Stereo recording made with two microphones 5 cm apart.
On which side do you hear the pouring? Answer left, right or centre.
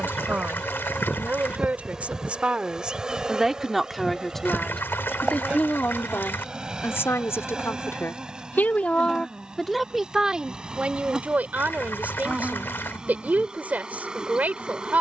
left.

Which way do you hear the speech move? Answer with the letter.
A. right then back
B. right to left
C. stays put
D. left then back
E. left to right
D.